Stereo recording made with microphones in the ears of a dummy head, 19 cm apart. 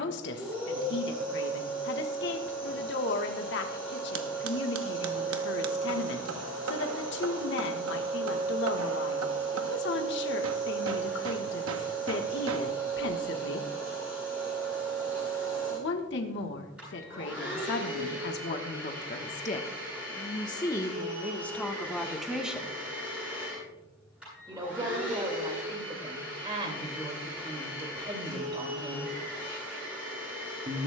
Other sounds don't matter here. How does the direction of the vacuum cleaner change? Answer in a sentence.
In this clip you hear the vacuum cleaner stay put.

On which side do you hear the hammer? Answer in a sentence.
You can hear the hammer on the right.